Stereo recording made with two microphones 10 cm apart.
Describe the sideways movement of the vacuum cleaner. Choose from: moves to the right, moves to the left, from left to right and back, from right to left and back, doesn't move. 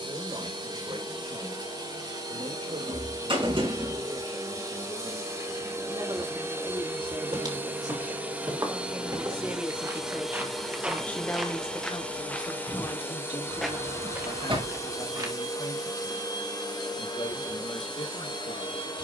moves to the left.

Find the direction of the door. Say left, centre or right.
right.